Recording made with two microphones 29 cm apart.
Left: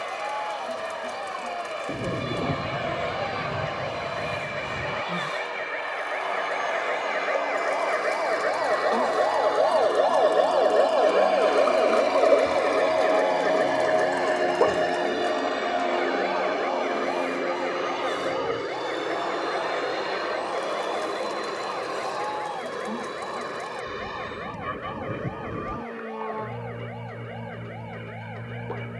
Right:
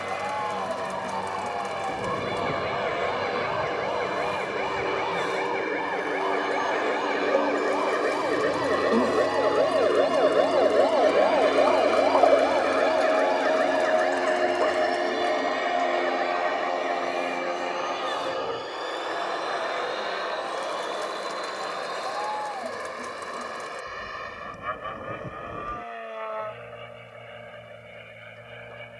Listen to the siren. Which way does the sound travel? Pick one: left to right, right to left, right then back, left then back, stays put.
right to left.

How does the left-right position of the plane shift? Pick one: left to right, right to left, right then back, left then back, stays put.
right to left.